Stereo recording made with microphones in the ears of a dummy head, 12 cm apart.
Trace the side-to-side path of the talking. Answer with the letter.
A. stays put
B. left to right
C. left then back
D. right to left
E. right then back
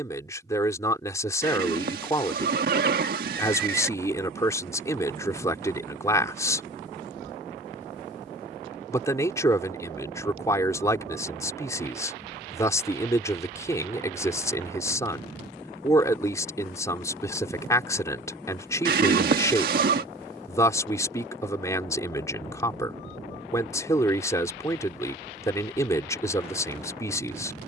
A.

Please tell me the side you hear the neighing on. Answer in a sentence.
You can hear the neighing on the right.